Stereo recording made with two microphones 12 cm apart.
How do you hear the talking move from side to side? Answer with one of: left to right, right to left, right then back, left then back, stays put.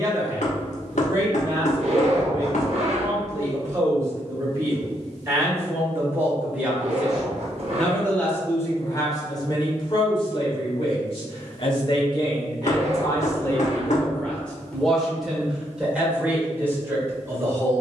left then back.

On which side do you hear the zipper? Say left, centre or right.
right.